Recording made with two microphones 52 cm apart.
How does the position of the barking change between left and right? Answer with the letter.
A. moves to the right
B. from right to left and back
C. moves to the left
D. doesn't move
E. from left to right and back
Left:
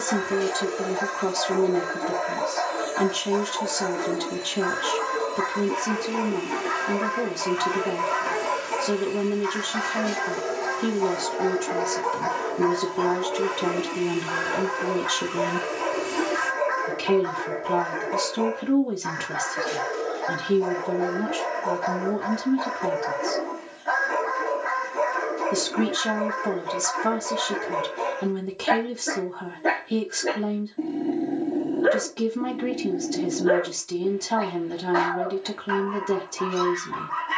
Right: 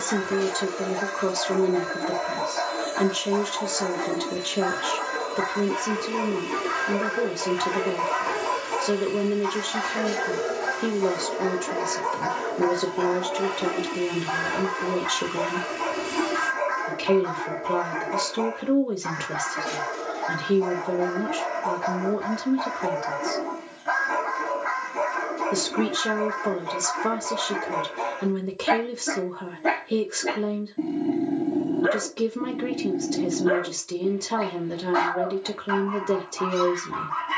B.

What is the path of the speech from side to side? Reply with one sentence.
You can hear the speech stay put.